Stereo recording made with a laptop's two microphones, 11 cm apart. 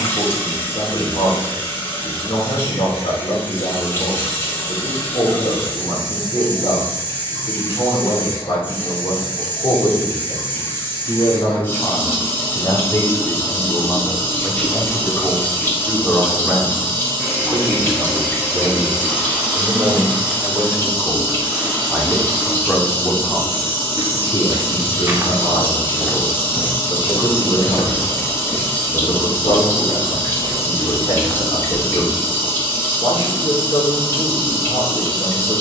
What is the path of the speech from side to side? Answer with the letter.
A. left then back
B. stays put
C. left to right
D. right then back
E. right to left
D.